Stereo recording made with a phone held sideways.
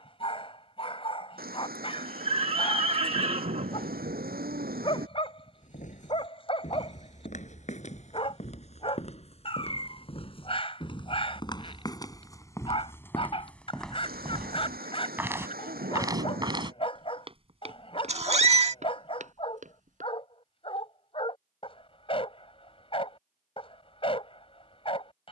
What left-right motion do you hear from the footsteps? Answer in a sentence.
You can hear the footsteps move to the right.